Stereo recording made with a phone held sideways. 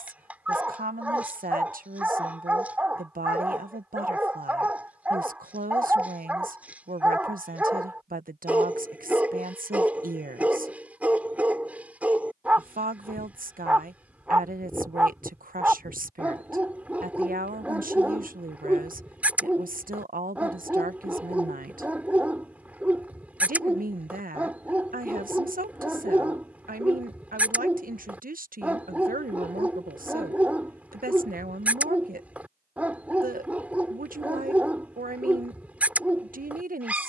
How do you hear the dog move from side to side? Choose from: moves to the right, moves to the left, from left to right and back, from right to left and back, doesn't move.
doesn't move.